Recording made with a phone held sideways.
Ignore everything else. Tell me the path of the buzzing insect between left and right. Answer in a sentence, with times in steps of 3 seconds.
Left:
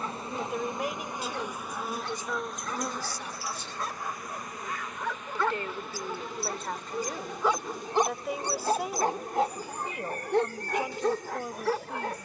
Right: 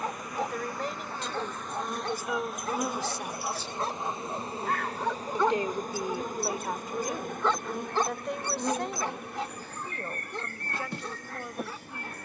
In this clip you hear the buzzing insect in the centre from 0 s and on the right from 3 s.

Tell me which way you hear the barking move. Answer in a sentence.
In this clip you hear the barking move to the left.